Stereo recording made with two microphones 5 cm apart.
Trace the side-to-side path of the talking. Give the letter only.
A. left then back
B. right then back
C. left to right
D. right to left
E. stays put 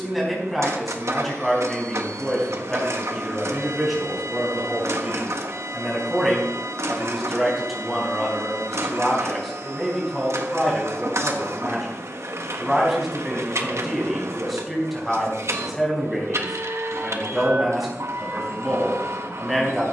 E.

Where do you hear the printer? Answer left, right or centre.
right.